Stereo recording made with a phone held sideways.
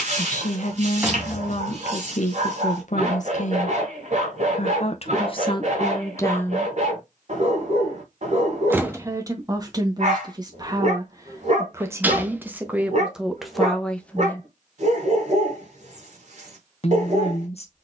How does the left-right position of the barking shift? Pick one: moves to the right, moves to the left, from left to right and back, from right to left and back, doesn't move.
doesn't move.